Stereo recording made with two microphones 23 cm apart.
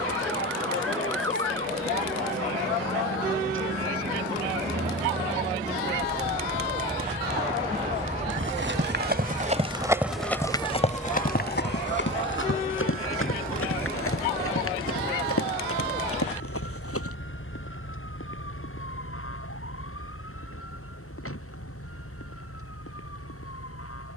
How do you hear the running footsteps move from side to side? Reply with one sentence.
You can hear the running footsteps move from right to left.